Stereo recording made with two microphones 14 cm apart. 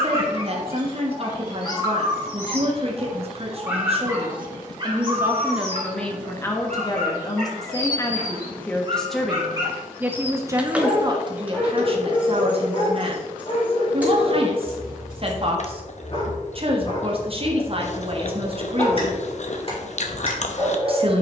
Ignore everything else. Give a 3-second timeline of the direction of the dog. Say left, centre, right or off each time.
left, right, right, centre, left, left, left.